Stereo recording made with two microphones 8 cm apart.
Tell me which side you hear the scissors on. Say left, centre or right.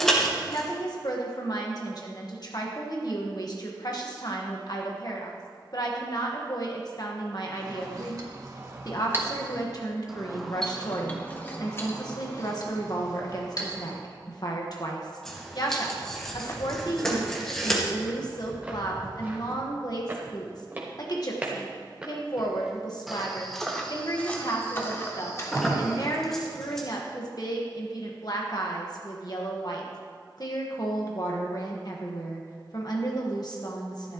centre.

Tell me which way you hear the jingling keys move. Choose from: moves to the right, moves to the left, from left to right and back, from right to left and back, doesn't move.
moves to the left.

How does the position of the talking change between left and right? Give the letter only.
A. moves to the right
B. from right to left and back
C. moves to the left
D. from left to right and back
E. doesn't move
E.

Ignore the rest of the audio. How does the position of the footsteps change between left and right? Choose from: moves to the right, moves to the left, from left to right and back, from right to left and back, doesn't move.
from left to right and back.